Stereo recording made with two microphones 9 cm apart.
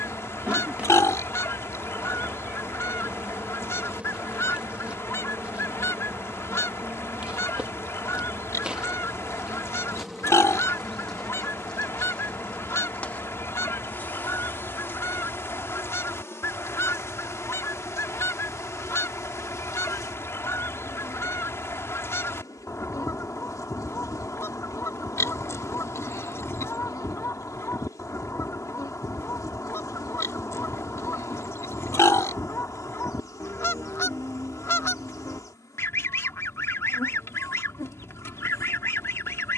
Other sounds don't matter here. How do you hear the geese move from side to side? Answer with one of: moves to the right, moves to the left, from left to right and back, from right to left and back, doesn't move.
doesn't move.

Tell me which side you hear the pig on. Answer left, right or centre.
left.